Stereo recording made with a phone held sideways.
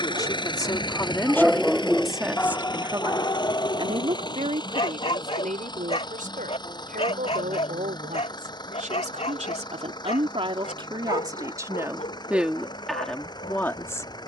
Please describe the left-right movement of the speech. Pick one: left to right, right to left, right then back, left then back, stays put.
right then back.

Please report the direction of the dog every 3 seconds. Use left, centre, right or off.
centre, left, left, left, left.